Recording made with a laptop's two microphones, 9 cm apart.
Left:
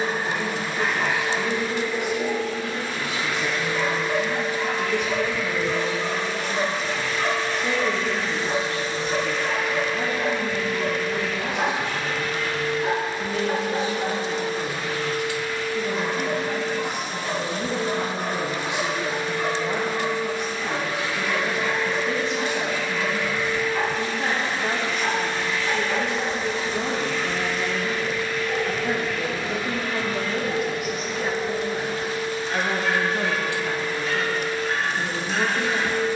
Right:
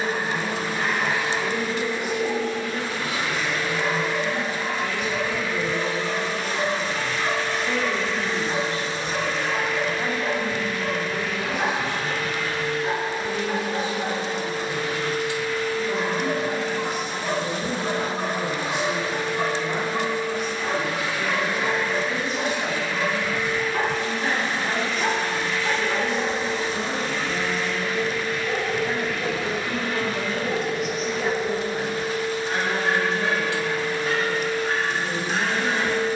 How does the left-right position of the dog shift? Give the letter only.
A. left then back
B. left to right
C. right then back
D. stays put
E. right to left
B.